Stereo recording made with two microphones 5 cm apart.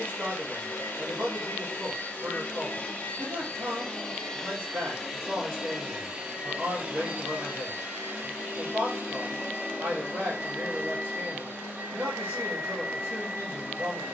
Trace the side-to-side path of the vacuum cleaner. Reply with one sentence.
You can hear the vacuum cleaner travel towards the right.